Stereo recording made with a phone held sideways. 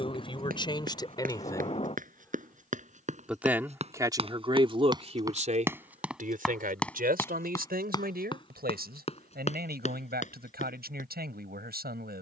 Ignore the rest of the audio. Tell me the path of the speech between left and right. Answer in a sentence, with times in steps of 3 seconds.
You can hear the speech on the left from 0 s and on the right from 3 s.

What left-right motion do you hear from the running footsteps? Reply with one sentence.
In this clip you hear the running footsteps go from the right side to the left.